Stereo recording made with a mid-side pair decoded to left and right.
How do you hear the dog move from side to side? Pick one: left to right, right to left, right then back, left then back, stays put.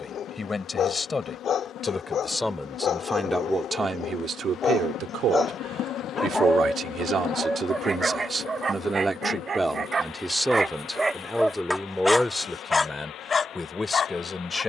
right then back.